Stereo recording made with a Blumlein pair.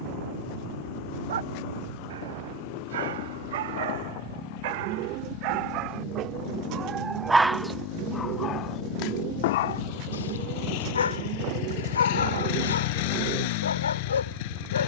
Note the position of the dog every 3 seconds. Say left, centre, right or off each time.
right, right, centre, left, left.